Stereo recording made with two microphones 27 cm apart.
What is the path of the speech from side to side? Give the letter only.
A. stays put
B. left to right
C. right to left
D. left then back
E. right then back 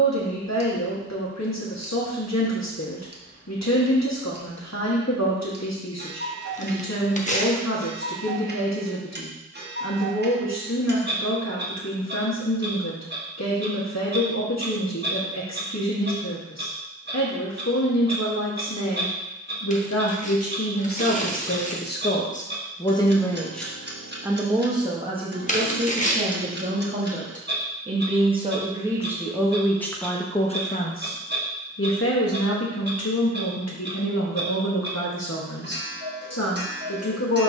E.